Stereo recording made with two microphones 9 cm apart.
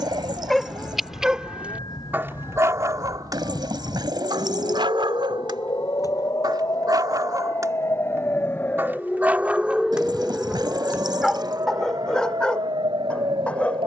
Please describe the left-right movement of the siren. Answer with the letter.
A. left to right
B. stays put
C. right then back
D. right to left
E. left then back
A.